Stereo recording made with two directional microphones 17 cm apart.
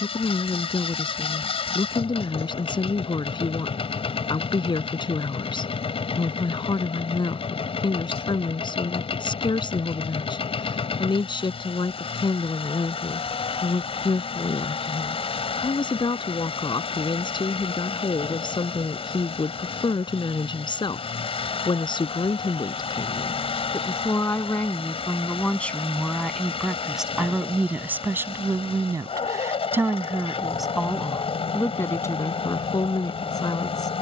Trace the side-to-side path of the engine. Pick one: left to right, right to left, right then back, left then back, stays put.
stays put.